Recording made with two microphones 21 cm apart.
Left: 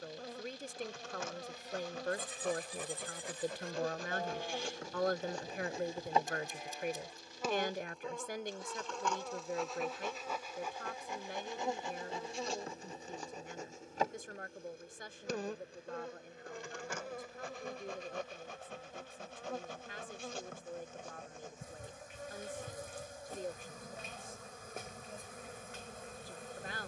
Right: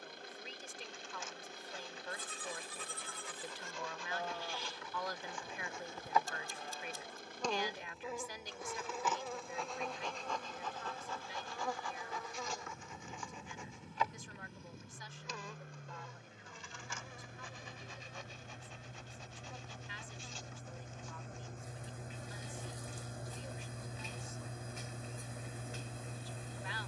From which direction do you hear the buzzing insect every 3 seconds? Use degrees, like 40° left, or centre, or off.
70° left, 50° left, 10° left, 10° left, 40° left, 70° left, 70° left, 70° left, 70° left.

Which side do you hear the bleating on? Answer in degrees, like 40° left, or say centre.
20° left.